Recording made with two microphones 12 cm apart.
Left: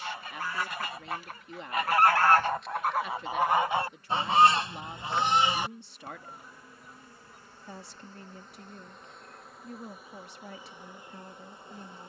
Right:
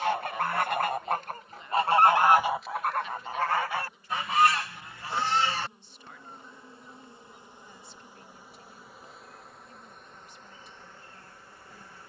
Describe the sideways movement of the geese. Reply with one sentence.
In this clip you hear the geese move from right to left and back again.